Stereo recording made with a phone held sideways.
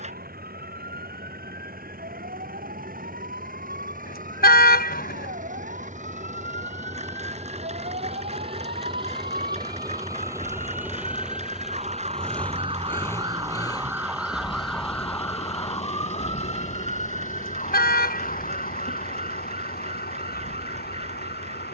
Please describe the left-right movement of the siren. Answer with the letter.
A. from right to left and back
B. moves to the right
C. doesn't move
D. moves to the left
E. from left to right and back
D.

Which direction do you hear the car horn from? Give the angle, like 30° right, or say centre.
70° left.